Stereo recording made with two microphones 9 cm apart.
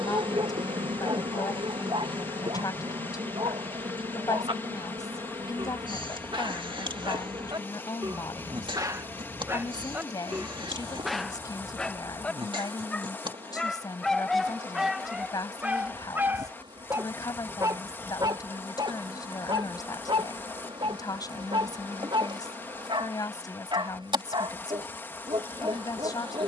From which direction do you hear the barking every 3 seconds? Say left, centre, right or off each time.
right, right, right, centre, centre, right, right, right, right.